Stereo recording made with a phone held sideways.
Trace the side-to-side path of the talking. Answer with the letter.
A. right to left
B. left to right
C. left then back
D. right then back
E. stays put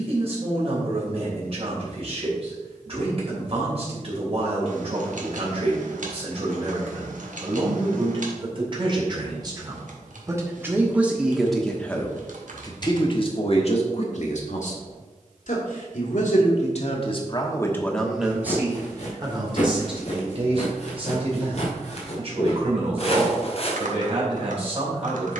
C.